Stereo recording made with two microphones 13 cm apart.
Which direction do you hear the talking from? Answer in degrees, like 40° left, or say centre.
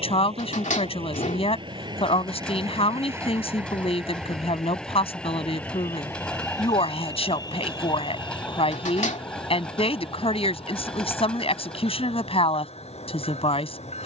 50° left.